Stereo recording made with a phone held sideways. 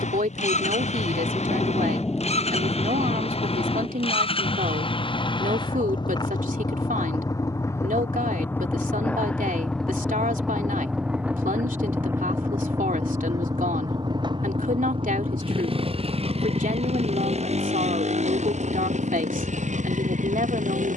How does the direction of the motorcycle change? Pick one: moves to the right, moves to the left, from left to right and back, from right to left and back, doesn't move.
moves to the right.